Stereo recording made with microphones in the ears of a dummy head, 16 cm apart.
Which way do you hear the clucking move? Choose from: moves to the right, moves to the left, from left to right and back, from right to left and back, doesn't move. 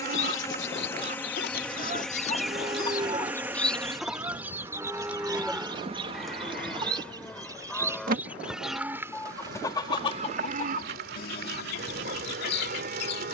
from left to right and back.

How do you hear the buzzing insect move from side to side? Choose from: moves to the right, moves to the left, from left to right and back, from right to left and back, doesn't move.
moves to the right.